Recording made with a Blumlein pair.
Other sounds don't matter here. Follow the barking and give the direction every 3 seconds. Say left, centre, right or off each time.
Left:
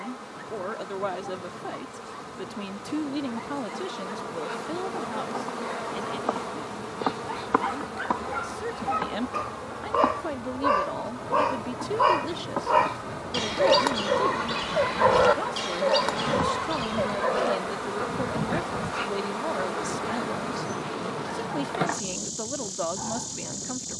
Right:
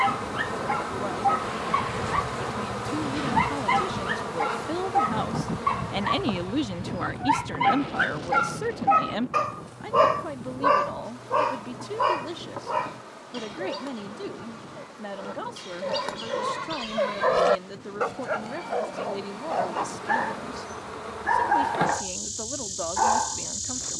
right, right, right, centre, left, centre, right, right.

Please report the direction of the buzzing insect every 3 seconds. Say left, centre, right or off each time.
right, centre, left, left, left, left, left, centre.